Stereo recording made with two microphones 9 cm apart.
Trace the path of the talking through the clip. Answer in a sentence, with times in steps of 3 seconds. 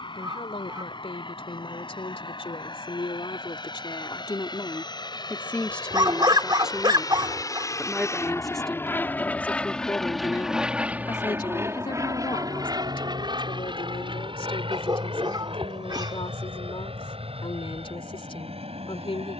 You can hear the talking on the left from 0 s, in the centre from 6 s and on the left from 9 s.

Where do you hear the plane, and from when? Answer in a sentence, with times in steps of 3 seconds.
In this clip you hear the plane on the left from 0 s, in the centre from 9 s and on the right from 12 s.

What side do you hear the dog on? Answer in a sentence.
In this clip you hear the dog on the right.